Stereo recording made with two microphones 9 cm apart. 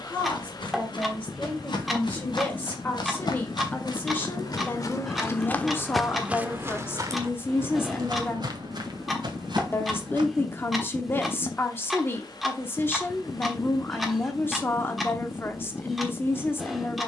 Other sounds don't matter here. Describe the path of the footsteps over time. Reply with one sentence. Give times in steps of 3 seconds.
In this clip you hear the footsteps on the left from 0 s, on the right from 6 s and not at all from 12 s.